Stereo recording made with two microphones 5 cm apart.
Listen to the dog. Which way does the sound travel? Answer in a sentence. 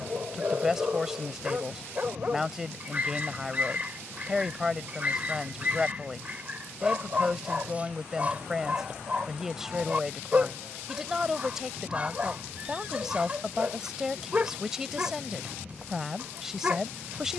In this clip you hear the dog stay put.